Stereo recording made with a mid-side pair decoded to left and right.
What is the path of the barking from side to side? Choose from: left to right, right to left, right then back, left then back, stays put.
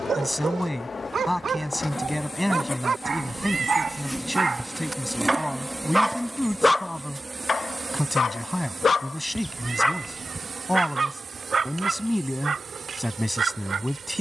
left then back.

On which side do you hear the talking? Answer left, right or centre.
centre.